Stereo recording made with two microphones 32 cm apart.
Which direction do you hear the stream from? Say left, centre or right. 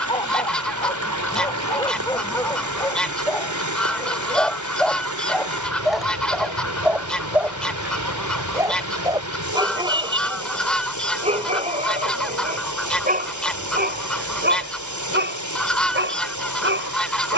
right.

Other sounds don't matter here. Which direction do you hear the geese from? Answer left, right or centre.
centre.